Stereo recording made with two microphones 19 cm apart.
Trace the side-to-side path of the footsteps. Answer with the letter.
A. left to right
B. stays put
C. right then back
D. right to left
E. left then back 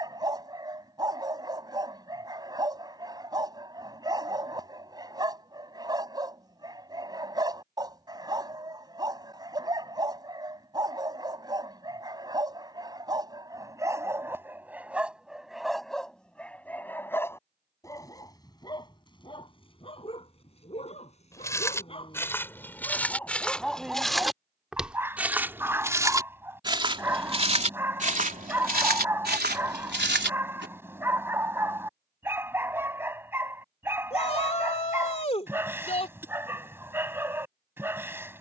A.